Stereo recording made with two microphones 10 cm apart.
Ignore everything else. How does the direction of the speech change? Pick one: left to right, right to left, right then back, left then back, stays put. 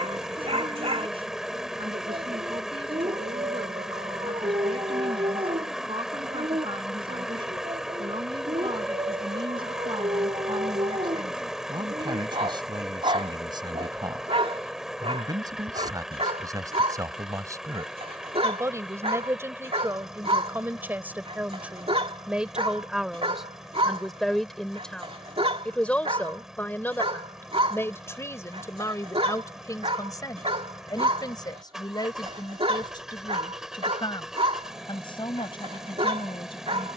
right to left.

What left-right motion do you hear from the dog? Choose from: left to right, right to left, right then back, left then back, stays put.
stays put.